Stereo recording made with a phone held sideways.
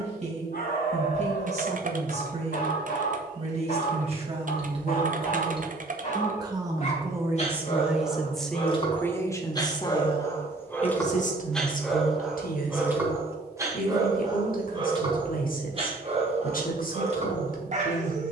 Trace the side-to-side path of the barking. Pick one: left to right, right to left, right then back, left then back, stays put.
left to right.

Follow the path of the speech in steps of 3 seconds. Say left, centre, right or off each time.
right, right, centre, left, left, left.